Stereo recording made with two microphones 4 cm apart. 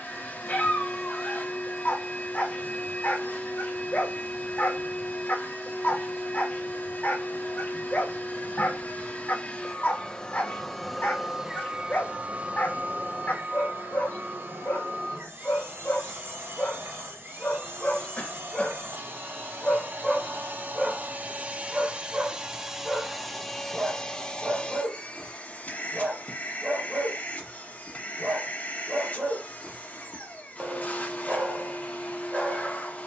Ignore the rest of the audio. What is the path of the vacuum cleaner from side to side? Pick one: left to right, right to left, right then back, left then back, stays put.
right then back.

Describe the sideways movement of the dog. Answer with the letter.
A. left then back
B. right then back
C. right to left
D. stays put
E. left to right
E.